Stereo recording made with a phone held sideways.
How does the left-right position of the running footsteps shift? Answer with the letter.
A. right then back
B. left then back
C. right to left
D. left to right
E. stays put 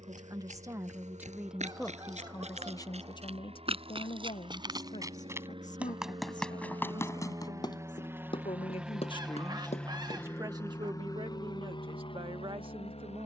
C.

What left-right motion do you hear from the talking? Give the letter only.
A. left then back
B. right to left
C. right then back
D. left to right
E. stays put
A.